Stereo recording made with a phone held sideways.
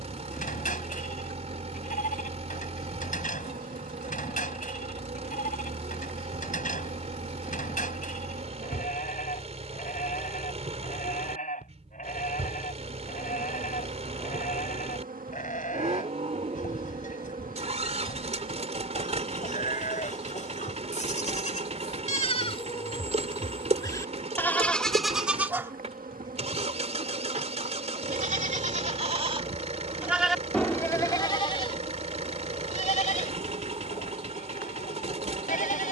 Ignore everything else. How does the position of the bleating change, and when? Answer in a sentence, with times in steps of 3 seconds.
In this clip you hear the bleating on the left from 0 s, in the centre from 24 s, on the right from 27 s and on the left from 30 s.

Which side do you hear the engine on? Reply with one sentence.
In this clip you hear the engine on the right.